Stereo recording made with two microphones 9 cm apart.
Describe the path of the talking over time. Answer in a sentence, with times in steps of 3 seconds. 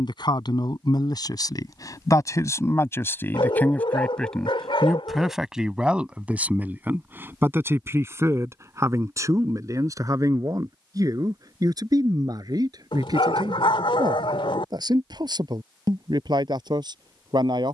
In this clip you hear the talking on the left from 0 s, in the centre from 3 s and on the right from 6 s.